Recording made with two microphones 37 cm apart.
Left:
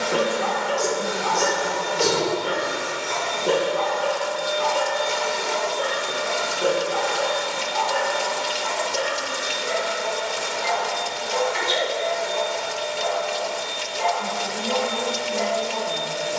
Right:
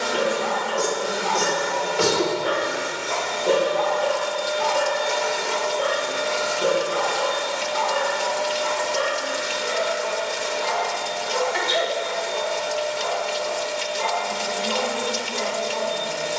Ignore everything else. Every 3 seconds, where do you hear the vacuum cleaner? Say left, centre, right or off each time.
right, centre, left, left, left, left.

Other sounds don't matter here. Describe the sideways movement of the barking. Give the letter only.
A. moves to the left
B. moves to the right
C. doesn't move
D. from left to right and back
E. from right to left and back
B.